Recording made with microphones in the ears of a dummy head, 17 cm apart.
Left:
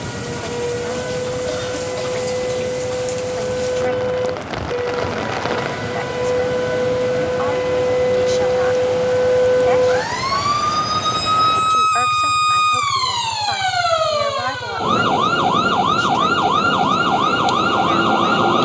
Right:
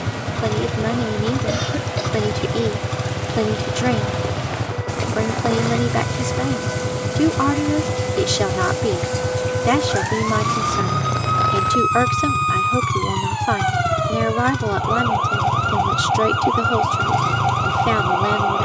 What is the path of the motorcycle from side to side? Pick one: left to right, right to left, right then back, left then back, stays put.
stays put.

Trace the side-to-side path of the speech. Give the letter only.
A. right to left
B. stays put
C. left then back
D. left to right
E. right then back
B.